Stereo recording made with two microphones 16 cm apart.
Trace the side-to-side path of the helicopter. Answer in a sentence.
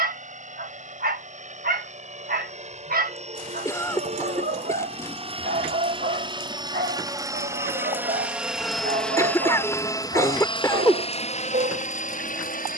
You can hear the helicopter move to the left.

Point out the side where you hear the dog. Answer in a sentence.
In this clip you hear the dog on the right.